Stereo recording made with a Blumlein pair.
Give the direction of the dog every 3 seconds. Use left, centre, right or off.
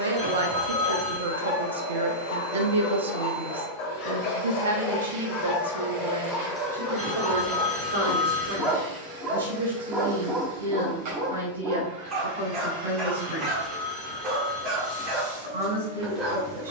left, left, centre, right, right, right.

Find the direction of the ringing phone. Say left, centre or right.
centre.